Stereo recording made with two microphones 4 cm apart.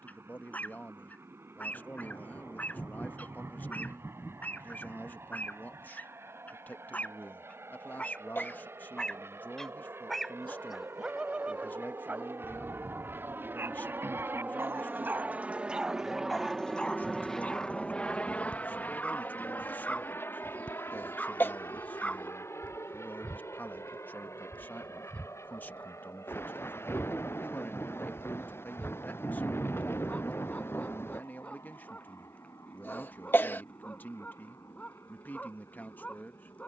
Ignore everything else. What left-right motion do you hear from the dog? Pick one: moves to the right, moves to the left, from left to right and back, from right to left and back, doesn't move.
from left to right and back.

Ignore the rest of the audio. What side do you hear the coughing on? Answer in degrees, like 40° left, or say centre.
50° left.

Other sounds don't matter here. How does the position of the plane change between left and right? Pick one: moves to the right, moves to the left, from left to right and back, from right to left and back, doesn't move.
moves to the left.